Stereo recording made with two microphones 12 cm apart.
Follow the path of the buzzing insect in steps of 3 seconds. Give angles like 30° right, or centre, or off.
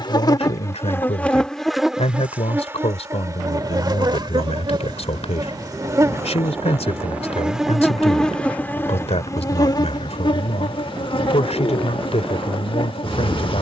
10° left, 30° right, centre, 40° left, 50° left.